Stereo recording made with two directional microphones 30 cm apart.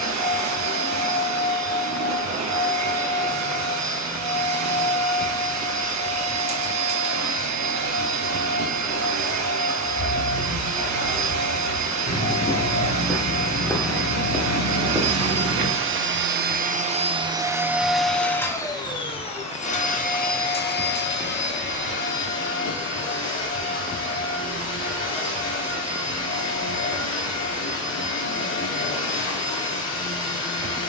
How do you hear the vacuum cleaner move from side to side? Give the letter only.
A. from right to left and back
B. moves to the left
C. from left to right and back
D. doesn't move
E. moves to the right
B.